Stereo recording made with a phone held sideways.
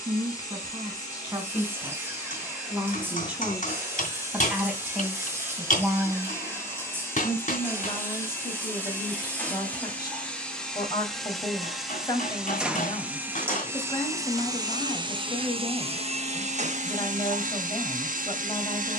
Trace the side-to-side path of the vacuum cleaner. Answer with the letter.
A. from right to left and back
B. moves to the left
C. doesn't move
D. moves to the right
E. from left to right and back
D.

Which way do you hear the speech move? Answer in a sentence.
In this clip you hear the speech move from right to left.